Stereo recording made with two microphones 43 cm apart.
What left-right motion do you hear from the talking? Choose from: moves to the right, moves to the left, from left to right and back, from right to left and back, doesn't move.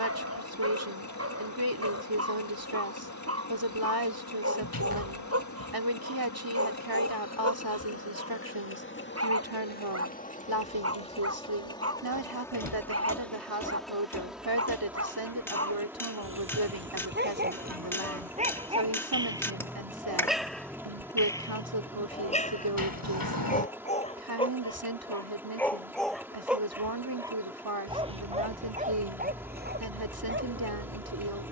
doesn't move.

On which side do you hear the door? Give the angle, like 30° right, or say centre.
60° left.